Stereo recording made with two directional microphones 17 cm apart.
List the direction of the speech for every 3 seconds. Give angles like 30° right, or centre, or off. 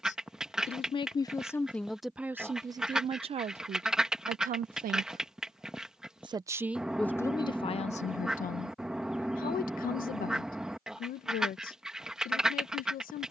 10° left, 50° right, 20° left, 60° left, 60° left.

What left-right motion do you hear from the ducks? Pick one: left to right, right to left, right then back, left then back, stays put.
stays put.